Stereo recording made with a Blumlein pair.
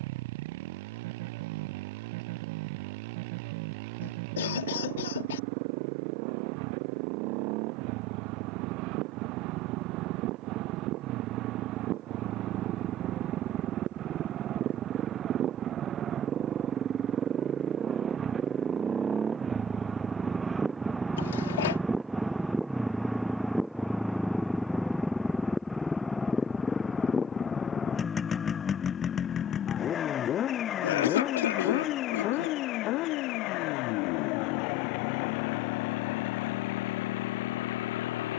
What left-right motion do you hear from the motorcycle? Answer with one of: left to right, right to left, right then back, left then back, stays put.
right to left.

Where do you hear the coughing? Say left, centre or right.
left.